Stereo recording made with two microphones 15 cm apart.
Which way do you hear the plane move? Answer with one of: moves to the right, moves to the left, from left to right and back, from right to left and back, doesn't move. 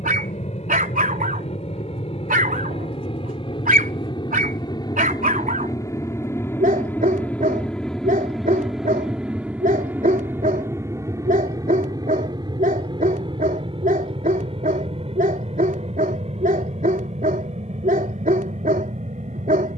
moves to the right.